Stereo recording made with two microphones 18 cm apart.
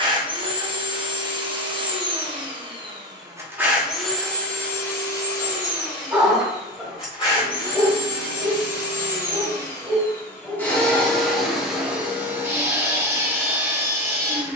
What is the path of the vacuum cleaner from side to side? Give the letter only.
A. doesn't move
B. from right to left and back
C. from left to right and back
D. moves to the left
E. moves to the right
B.